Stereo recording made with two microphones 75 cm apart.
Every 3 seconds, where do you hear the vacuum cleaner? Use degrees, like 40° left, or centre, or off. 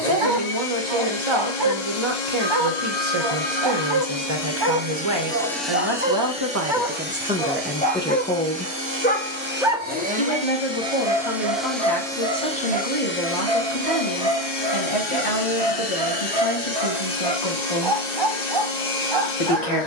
60° left, 20° left, 10° right, 10° right, 20° left, 60° left, 60° left.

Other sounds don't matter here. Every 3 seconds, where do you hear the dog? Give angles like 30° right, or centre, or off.
30° right, 30° right, 10° left, 20° right, 30° right, 30° right, 30° right.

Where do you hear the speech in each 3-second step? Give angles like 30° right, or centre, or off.
40° right, 40° right, 10° right, 40° left, 50° left, 50° left, 50° left.